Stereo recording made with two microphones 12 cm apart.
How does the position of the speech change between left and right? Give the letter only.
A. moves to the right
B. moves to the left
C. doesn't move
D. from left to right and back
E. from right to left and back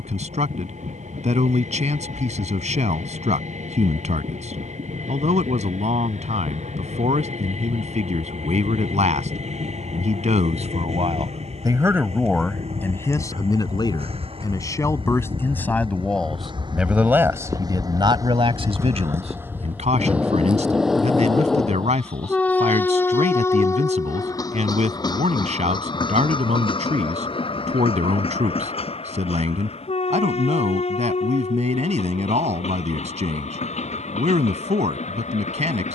E.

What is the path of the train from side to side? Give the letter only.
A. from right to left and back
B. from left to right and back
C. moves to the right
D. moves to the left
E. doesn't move
D.